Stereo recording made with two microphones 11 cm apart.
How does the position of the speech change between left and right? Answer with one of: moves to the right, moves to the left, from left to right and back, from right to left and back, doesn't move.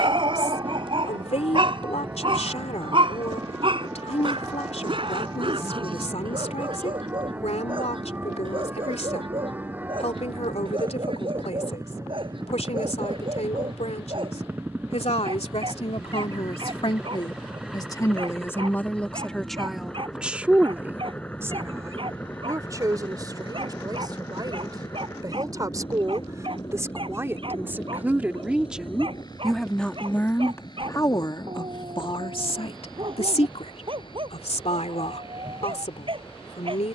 from left to right and back.